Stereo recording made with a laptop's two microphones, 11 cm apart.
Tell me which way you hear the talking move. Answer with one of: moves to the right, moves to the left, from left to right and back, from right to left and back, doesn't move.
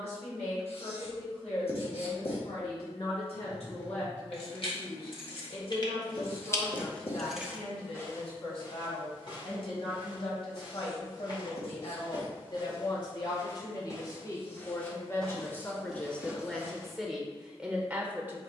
moves to the right.